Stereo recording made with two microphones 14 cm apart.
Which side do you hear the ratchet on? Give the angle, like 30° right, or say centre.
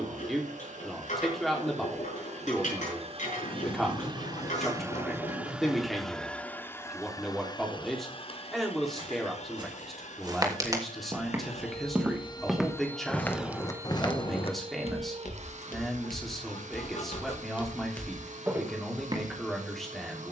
60° left.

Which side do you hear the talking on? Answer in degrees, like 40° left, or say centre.
centre.